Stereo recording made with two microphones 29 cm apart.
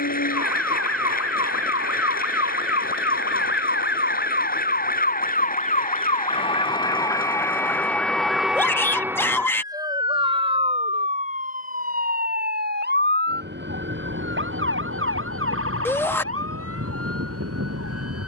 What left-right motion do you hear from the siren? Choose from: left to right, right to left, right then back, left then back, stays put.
left to right.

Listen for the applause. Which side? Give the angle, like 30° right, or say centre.
30° left.